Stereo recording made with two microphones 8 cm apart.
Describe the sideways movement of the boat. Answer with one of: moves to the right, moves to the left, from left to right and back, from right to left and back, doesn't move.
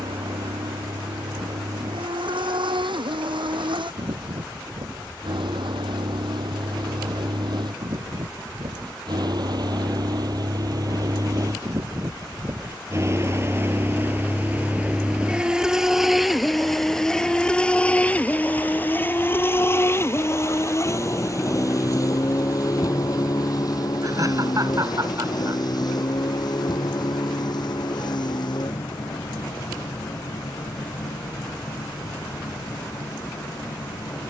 moves to the left.